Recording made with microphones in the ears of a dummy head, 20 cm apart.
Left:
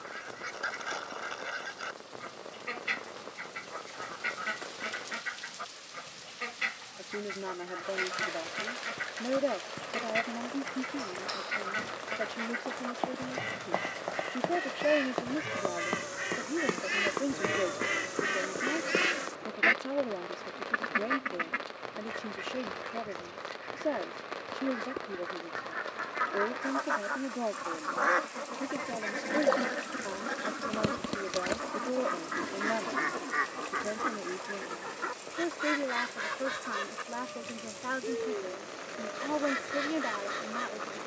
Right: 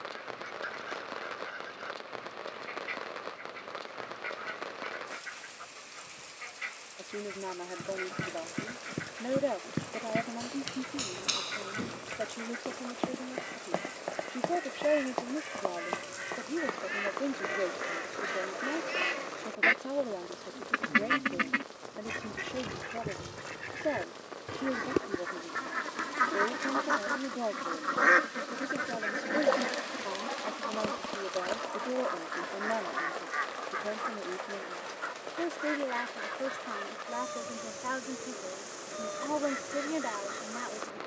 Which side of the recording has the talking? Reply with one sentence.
You can hear the talking in the centre.